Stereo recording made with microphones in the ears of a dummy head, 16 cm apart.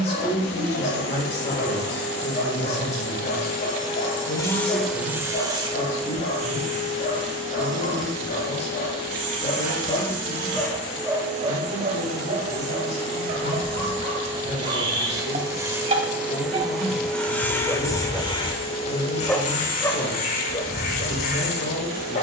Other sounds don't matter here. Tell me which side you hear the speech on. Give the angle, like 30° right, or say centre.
40° left.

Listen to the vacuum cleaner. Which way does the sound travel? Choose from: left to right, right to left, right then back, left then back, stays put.
right then back.